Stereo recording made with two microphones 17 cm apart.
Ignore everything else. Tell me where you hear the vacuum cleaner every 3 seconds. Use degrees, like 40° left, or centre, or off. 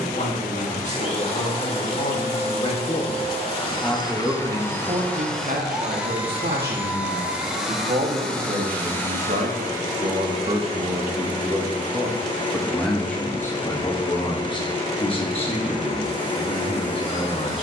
40° left, 20° left, centre, 30° left, 30° left, 30° left.